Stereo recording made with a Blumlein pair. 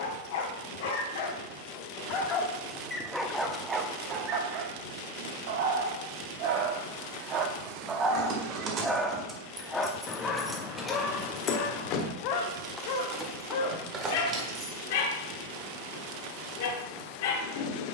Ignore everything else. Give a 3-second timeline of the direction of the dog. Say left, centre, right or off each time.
left, right, right, left, left, left.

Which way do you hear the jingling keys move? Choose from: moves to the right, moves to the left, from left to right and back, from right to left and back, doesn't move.
from right to left and back.